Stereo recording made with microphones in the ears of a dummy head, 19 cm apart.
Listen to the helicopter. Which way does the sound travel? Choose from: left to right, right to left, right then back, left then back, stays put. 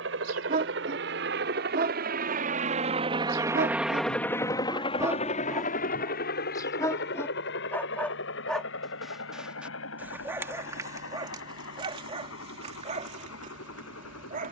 right to left.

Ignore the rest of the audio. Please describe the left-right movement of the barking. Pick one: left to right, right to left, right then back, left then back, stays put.
left then back.